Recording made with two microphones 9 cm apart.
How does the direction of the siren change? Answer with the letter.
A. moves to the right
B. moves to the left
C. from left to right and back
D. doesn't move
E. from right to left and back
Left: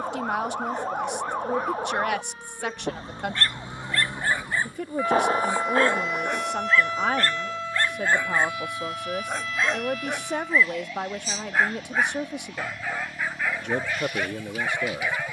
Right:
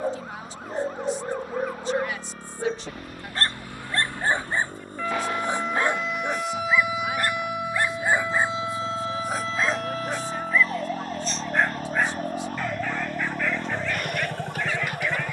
A.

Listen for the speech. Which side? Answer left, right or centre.
left.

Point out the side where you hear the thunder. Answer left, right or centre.
left.